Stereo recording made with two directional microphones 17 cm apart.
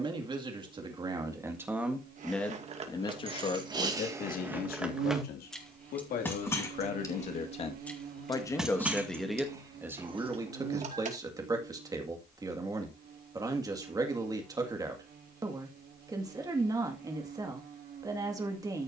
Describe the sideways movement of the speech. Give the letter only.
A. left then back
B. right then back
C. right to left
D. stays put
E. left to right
A.